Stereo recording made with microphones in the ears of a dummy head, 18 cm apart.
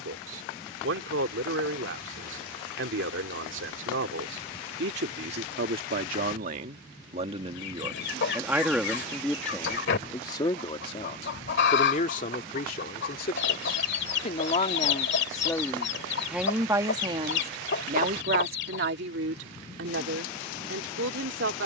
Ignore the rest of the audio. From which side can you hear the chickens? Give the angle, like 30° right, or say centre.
60° left.